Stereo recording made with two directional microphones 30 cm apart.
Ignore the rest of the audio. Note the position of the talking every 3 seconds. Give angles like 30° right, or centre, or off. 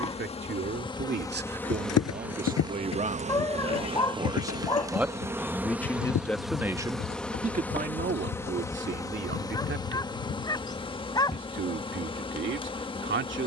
30° right, 10° right, 20° right, 40° right, 40° right.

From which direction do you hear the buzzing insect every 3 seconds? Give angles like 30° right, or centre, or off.
10° left, 10° right, centre, 20° left, 20° left.